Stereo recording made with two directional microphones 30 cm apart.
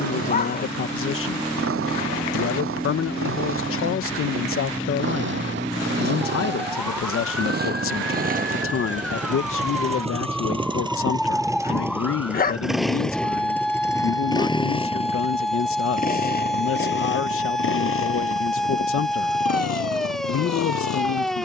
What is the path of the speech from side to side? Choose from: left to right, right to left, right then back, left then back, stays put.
stays put.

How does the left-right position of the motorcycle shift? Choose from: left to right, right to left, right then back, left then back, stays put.
right to left.